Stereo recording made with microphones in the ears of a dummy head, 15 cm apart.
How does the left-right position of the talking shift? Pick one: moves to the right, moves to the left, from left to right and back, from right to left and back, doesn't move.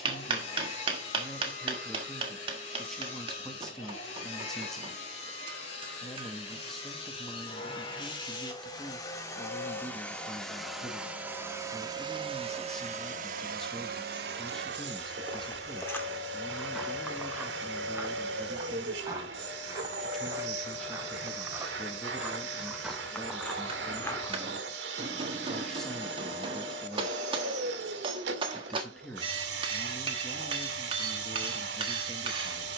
doesn't move.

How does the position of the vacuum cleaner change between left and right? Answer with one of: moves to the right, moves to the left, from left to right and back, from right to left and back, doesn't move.
moves to the right.